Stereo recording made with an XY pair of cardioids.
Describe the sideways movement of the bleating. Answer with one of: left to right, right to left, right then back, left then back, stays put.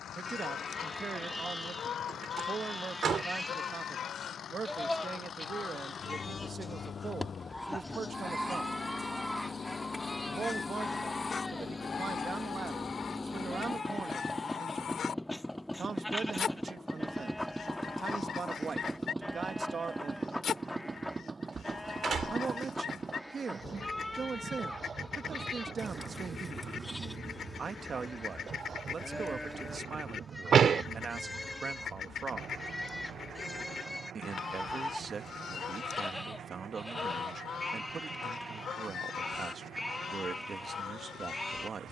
stays put.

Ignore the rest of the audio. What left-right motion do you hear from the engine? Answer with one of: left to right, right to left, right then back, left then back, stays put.
left to right.